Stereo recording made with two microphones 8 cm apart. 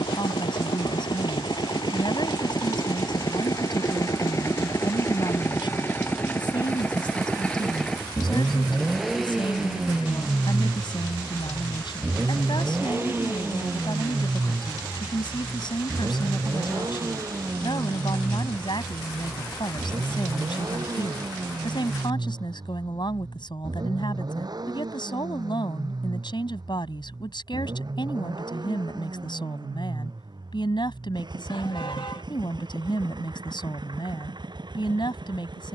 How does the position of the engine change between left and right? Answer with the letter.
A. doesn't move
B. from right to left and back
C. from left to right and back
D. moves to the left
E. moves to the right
E.